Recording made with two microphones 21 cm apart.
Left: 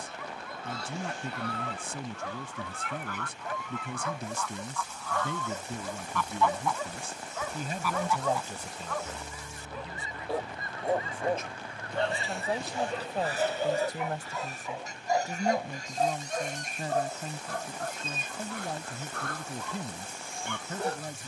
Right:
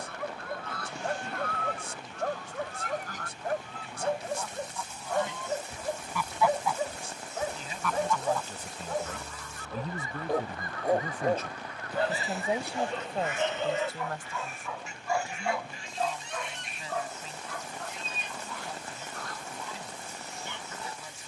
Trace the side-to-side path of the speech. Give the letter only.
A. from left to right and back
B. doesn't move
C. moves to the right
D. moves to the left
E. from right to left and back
A.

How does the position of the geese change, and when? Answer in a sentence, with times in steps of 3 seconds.
You can hear the geese on the right from 0 s, in the centre from 6 s and on the left from 9 s.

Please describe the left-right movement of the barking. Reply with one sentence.
You can hear the barking move to the left.